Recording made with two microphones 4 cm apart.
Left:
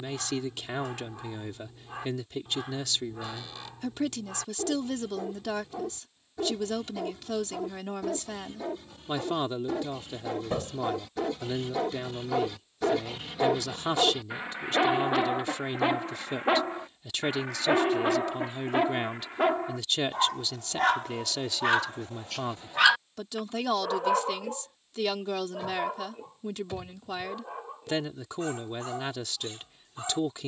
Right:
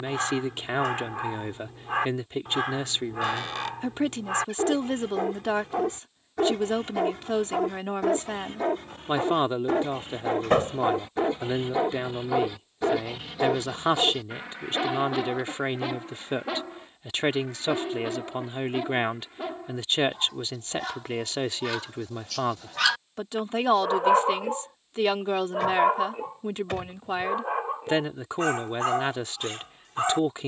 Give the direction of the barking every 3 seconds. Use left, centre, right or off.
right, right, right, right, centre, left, left, left, right, right.